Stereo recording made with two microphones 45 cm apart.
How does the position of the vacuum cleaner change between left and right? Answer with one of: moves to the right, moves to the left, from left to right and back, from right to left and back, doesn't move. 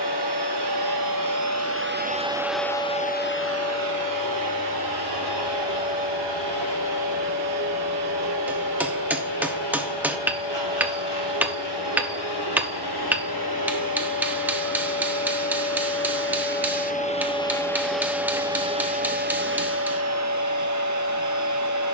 from right to left and back.